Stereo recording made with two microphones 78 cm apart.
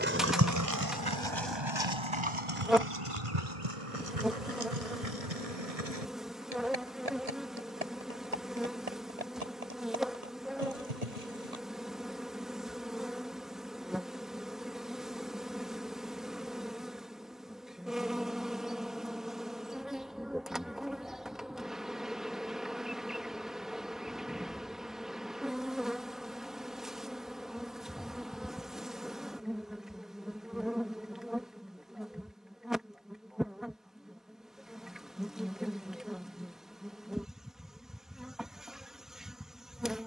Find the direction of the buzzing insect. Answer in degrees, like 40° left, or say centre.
centre.